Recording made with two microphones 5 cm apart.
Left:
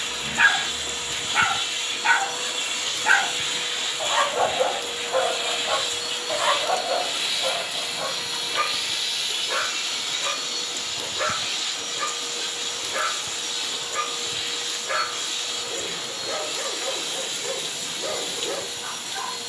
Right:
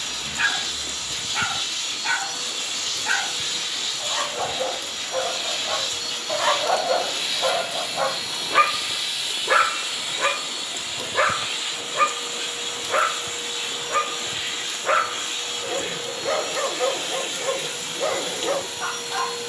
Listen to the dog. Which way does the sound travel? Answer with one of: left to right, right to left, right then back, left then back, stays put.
left to right.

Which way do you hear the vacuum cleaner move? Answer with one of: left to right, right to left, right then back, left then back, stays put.
left to right.